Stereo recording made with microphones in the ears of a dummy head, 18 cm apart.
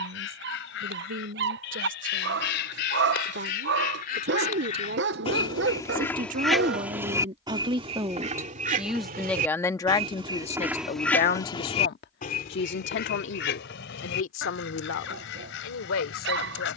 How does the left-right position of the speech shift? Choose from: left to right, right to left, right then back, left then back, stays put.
right to left.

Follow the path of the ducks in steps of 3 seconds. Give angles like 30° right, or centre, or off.
70° left, 40° left, 20° right, 10° right, 60° left, 70° left.